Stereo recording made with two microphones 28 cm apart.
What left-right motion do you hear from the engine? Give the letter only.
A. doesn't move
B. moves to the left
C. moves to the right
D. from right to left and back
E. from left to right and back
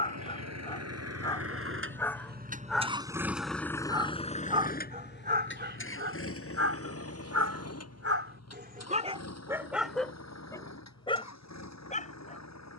B.